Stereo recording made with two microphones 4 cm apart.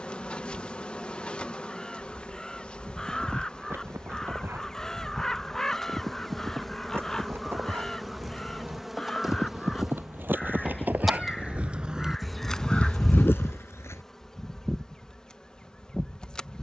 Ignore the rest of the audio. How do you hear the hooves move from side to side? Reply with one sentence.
You can hear the hooves travel towards the left.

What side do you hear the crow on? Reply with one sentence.
In this clip you hear the crow in the centre.